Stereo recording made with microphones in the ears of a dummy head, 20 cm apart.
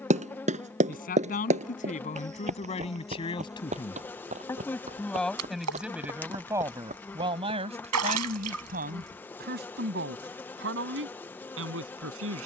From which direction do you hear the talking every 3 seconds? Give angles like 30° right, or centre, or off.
30° left, 10° left, 20° right, 50° right.